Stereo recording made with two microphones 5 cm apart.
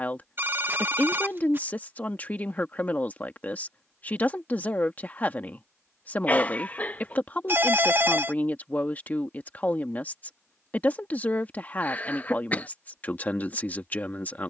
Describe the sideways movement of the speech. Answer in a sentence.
You can hear the speech stay put.